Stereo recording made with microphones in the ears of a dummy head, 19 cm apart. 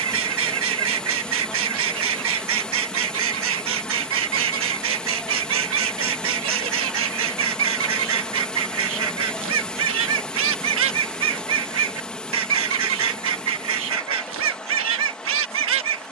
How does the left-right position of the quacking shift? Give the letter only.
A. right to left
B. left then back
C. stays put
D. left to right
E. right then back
C.